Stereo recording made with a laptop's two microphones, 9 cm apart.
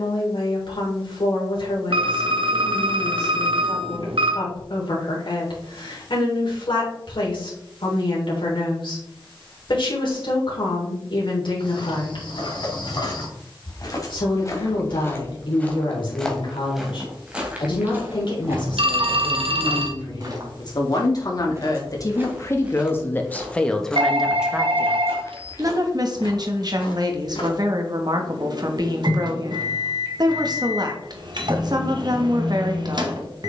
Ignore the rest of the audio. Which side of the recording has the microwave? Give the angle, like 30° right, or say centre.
50° right.